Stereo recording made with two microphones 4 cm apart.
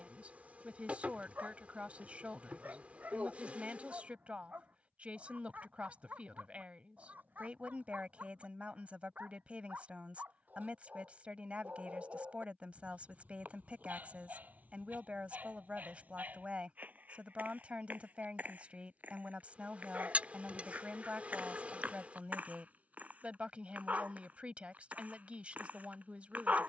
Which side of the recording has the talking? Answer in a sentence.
You can hear the talking on the right.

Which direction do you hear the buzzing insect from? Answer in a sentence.
You can hear the buzzing insect on the right.